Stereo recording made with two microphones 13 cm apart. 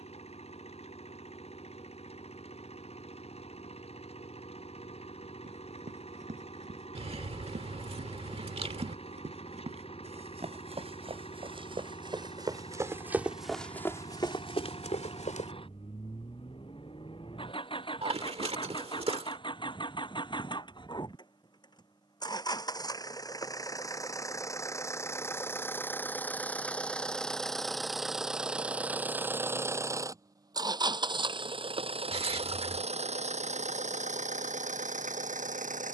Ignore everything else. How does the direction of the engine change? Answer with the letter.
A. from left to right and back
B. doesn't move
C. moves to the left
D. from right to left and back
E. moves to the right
E.